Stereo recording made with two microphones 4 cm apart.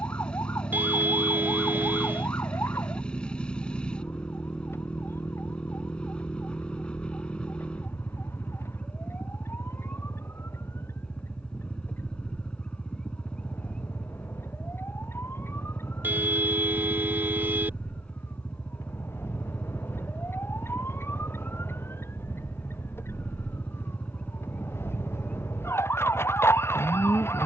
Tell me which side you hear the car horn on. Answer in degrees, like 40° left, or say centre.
50° right.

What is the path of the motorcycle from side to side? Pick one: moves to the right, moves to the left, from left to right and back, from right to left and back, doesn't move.
doesn't move.